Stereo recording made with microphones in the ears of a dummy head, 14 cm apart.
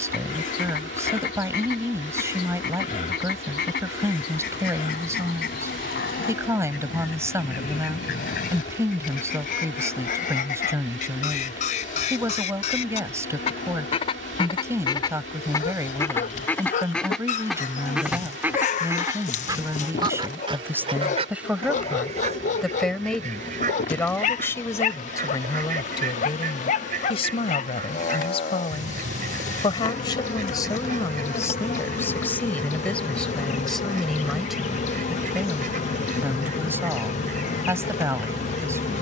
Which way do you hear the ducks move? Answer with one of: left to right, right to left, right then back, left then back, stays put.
left to right.